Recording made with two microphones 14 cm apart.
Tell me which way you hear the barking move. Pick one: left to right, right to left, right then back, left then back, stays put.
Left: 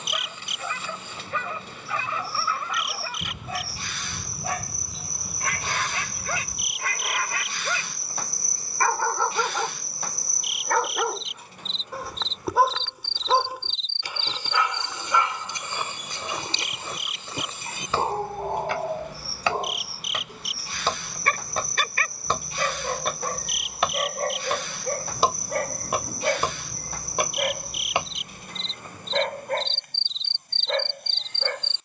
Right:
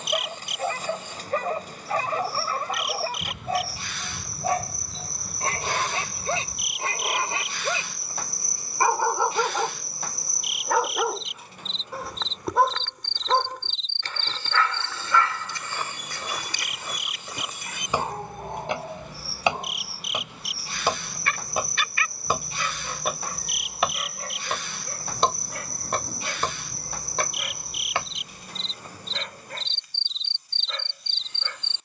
right to left.